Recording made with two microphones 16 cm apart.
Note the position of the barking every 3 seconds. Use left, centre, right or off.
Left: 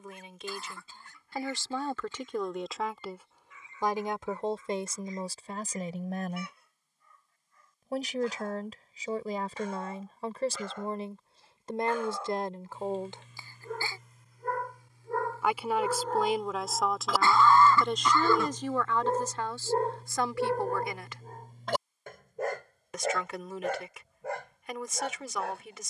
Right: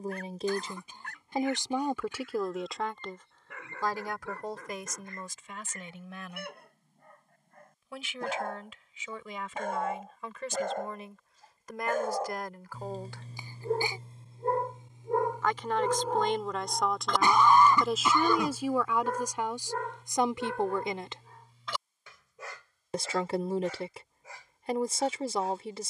right, right, right, right, right, centre, left, left, left.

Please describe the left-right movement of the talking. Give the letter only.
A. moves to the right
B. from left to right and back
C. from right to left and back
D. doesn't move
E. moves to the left
C.